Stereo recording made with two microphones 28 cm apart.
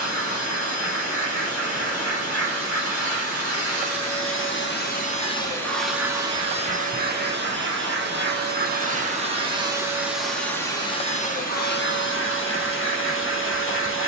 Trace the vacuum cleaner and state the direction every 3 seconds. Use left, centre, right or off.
left, left, right, centre, left.